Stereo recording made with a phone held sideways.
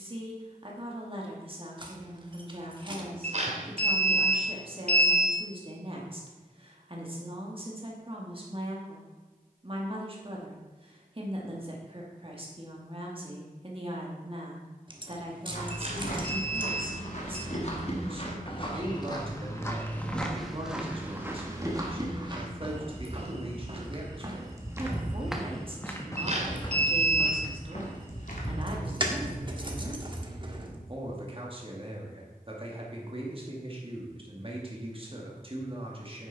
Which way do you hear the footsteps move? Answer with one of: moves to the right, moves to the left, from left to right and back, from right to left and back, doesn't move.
from left to right and back.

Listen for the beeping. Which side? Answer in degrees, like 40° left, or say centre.
50° right.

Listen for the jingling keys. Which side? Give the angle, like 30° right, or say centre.
30° right.